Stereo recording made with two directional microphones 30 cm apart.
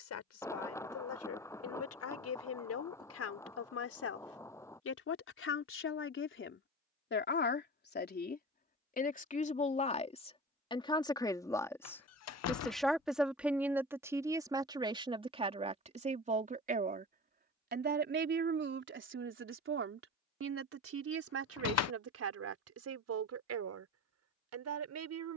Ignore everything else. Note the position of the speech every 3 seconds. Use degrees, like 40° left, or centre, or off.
60° left, 50° left, 40° left, 20° left, 10° right, 20° right, 40° right, 50° right, 60° right.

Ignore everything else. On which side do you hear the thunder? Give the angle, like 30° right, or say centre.
10° left.